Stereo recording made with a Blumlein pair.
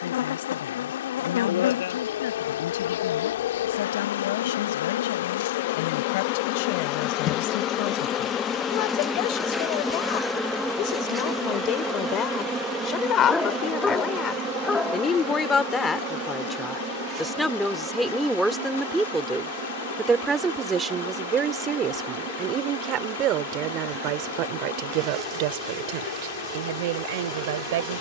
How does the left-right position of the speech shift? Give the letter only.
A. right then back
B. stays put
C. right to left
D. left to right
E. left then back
D.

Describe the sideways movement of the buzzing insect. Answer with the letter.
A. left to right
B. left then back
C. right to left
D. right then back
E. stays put
A.